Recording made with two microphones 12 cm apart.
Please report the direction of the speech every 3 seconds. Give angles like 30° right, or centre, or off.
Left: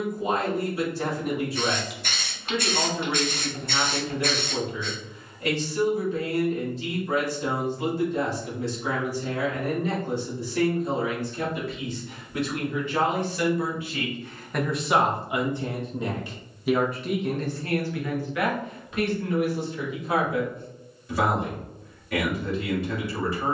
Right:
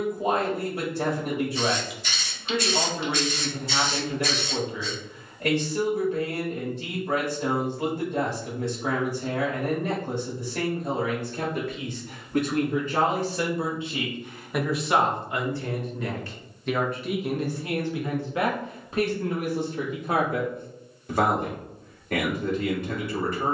60° right, 60° right, 60° right, 60° right, 30° right, centre, 40° right, 60° right.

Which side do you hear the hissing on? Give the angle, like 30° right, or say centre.
60° left.